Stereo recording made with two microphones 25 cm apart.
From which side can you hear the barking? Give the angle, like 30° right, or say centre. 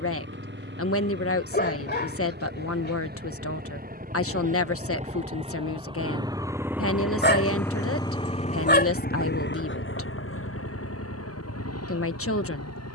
40° left.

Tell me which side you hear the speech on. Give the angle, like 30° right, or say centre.
70° left.